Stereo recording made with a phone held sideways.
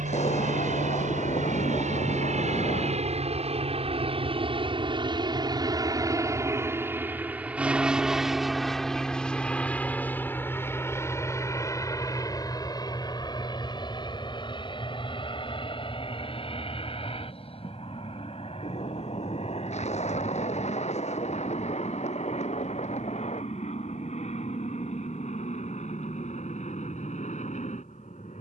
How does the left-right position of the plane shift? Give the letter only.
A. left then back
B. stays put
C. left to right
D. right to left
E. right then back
D.